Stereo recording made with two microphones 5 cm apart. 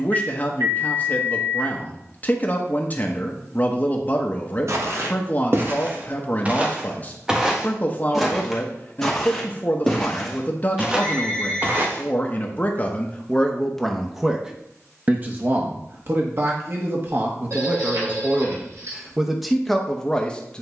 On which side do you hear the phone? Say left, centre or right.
right.